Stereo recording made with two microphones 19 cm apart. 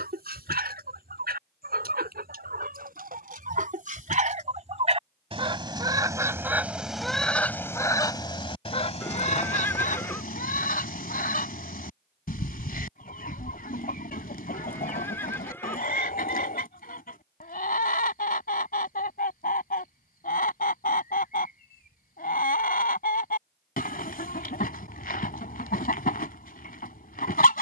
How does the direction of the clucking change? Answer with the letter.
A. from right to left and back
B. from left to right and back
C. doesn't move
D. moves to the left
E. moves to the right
D.